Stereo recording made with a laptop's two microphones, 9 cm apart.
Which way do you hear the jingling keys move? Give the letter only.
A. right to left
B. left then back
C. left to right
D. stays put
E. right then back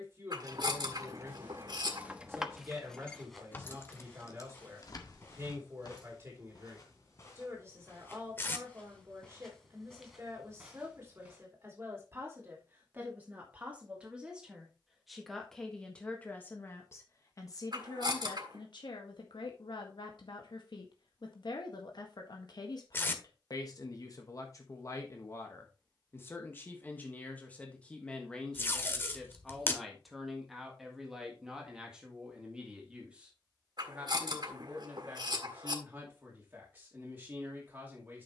A.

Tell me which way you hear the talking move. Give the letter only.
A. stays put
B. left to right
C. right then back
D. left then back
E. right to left
D.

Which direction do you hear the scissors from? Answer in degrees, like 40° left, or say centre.
60° right.